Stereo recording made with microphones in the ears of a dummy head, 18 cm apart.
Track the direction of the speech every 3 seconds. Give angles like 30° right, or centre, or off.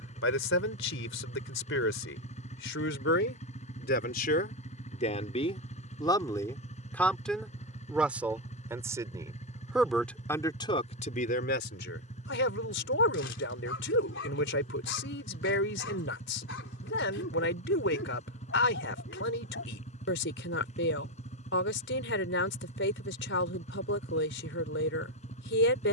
60° left, 40° left, centre, 20° left, 60° left, 60° left, 60° left, 60° left, 60° left.